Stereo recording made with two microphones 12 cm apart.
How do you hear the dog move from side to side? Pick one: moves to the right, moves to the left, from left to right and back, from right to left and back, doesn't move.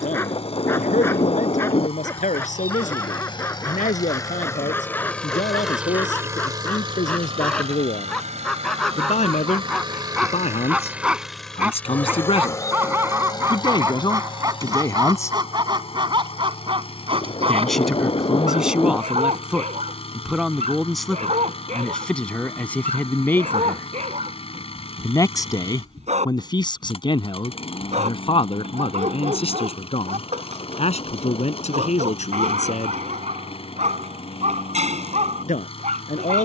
moves to the right.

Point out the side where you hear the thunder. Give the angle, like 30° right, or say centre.
40° left.